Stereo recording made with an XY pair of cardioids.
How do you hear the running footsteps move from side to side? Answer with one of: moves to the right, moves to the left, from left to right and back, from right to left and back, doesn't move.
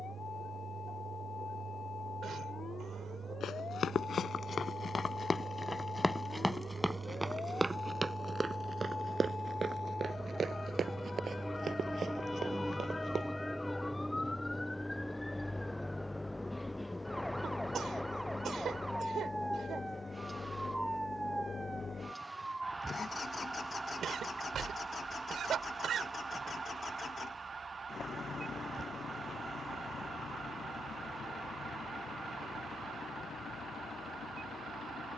moves to the right.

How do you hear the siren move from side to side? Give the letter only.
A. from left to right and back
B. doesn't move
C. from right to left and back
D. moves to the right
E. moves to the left
D.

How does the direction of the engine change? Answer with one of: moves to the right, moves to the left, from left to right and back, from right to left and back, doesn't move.
moves to the left.